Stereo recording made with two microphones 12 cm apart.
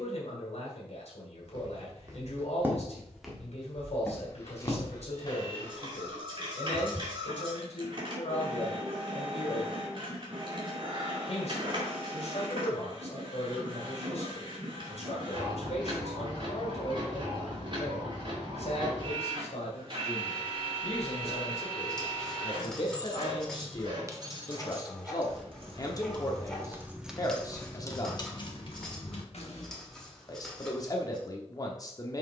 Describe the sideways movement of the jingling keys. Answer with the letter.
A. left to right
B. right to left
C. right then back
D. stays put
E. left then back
C.